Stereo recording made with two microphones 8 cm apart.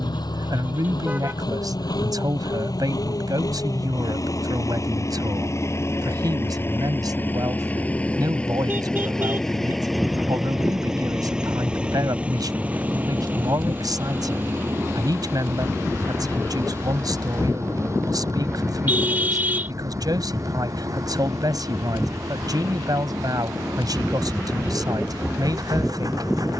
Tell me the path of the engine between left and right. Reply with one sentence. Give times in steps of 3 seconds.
In this clip you hear the engine on the left from 0 s, in the centre from 9 s and on the right from 12 s.